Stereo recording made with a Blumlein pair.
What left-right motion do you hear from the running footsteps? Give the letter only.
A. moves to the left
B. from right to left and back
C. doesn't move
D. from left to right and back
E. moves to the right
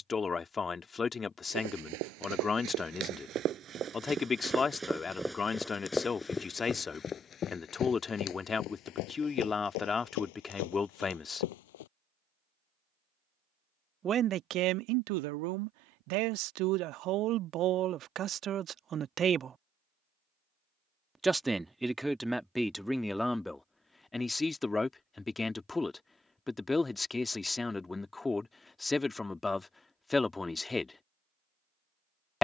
A.